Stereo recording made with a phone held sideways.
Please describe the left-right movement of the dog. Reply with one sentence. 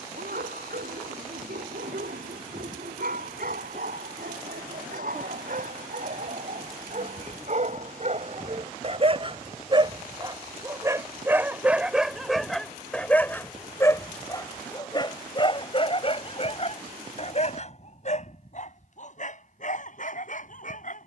In this clip you hear the dog move to the left.